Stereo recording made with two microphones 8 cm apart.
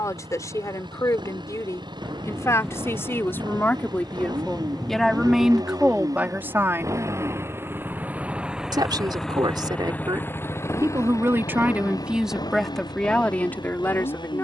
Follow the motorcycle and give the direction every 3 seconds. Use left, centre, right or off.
right, right, right, left, left.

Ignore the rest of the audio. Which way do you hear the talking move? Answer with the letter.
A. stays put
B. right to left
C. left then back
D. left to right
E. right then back
E.